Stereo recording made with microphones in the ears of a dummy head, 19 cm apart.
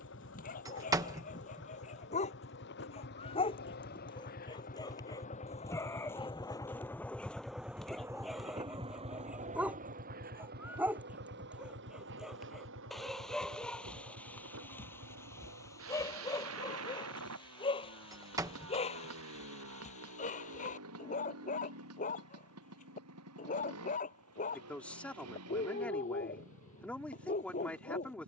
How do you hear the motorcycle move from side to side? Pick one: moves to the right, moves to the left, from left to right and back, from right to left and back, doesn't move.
moves to the right.